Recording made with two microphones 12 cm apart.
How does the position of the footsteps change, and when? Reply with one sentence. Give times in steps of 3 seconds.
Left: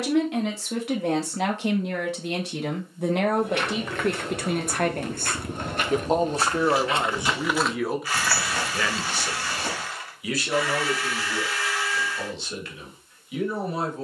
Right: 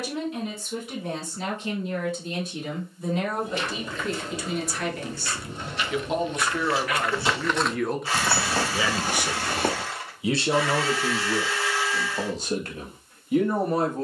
You can hear the footsteps not at all from 0 s, on the left from 3 s, in the centre from 6 s, on the right from 9 s and not at all from 12 s.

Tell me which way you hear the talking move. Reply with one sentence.
You can hear the talking move from left to right.